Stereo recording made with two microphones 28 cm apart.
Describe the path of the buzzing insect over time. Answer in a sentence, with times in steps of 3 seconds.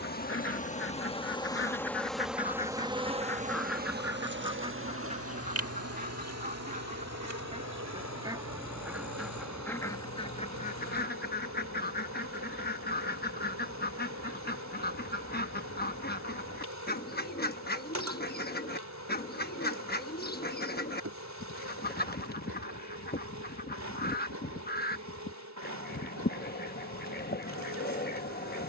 You can hear the buzzing insect in the centre from 0 s and on the right from 3 s.